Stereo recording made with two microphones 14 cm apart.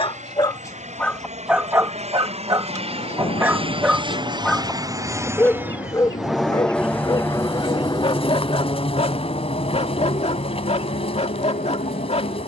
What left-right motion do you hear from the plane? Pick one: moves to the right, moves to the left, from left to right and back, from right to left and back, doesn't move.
moves to the left.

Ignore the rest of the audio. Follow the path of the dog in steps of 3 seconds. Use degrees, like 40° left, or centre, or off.
centre, centre, 30° left, 50° left.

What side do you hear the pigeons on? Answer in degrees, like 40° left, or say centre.
40° left.